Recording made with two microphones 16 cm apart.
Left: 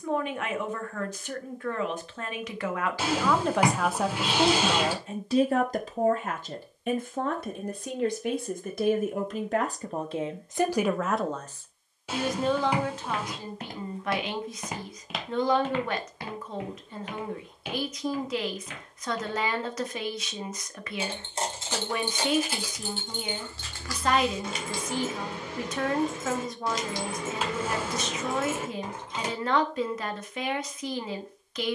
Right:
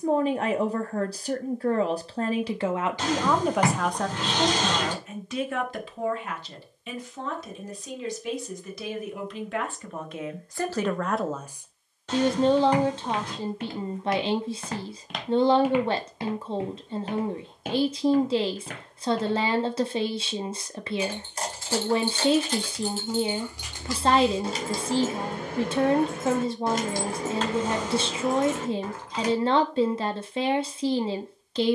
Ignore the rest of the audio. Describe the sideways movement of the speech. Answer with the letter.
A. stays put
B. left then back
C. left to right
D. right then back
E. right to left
B.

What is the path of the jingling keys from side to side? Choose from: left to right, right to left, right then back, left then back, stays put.
right then back.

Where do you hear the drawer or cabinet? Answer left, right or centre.
centre.